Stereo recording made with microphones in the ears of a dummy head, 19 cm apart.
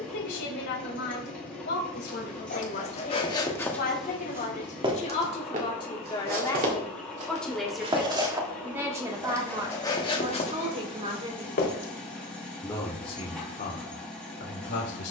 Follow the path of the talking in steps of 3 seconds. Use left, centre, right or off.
left, left, centre, right, left.